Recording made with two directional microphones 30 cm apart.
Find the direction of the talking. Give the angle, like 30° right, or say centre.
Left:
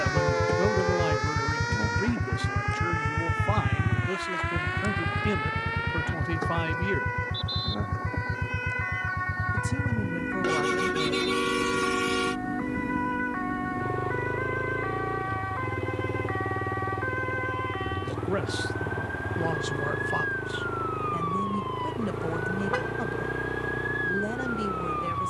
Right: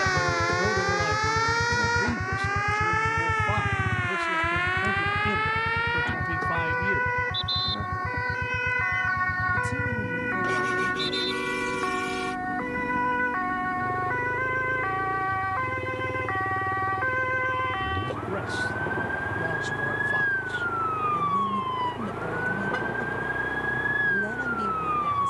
20° left.